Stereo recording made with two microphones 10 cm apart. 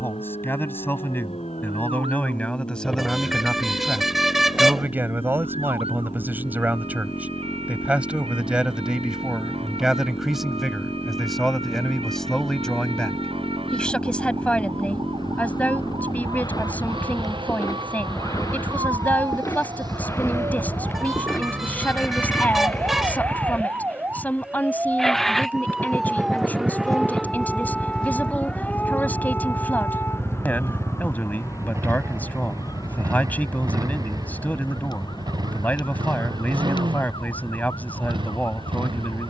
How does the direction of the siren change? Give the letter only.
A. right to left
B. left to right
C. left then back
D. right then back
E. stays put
A.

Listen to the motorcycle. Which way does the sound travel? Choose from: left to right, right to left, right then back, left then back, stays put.
left to right.